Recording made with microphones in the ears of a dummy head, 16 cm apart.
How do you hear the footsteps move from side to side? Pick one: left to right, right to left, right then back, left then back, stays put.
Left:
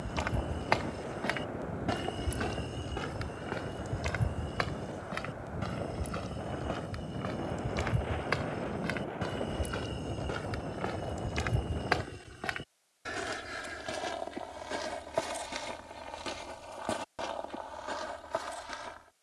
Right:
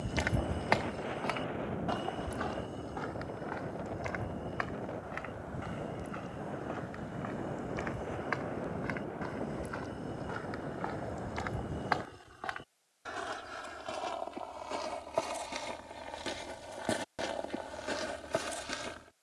left then back.